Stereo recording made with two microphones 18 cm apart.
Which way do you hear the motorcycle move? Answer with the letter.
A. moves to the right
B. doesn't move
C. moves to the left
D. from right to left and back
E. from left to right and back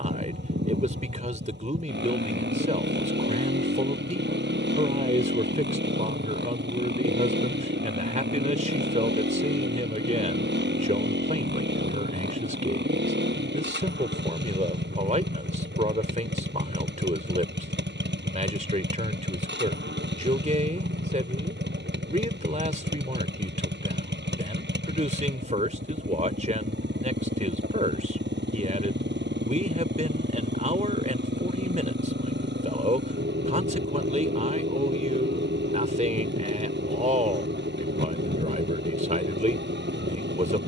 B.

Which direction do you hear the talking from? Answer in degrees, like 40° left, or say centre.
40° right.